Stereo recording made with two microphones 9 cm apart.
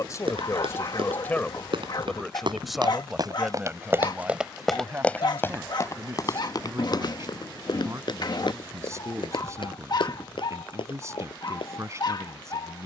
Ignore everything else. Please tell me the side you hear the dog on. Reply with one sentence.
You can hear the dog on the left.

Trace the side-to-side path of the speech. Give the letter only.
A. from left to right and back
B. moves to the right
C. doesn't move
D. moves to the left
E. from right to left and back
B.